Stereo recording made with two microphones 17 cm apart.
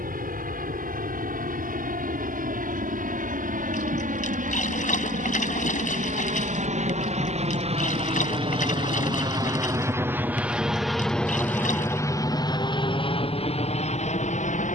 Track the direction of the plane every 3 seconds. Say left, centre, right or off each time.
right, right, right, centre, left.